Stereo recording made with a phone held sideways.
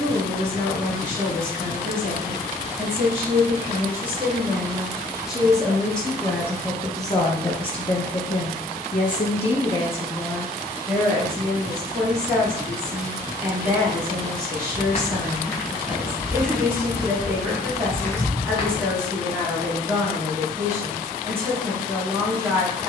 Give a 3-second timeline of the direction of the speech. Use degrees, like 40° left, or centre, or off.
20° right, 10° right, 30° left, 10° left, 20° right, 20° right, 20° right, 20° right.